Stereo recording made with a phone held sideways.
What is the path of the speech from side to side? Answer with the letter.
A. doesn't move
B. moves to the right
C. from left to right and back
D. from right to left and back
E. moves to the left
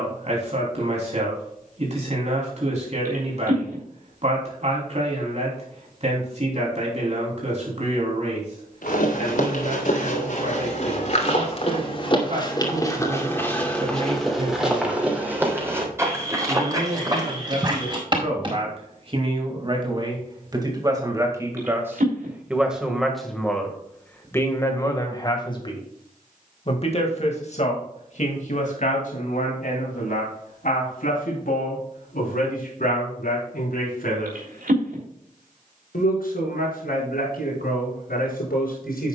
E.